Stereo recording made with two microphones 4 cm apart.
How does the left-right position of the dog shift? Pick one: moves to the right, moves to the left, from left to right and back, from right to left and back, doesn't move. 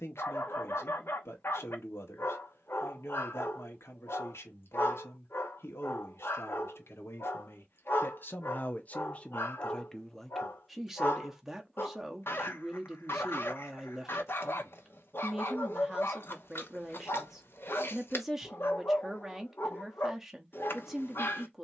doesn't move.